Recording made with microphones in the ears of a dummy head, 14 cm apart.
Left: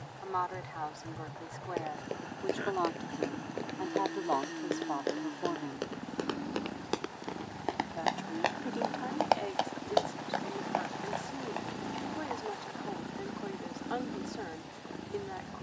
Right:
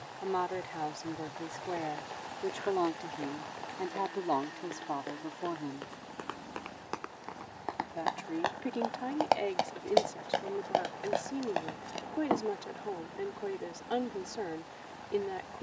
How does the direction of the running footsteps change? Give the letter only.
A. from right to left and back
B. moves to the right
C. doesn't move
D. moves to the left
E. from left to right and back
B.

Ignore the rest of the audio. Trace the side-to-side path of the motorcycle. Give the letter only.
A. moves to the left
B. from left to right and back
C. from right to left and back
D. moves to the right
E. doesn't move
E.